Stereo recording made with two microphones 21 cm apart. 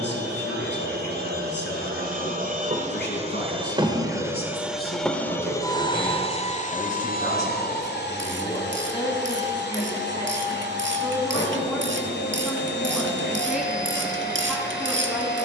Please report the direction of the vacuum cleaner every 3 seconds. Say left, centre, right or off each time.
right, centre, left, left, left.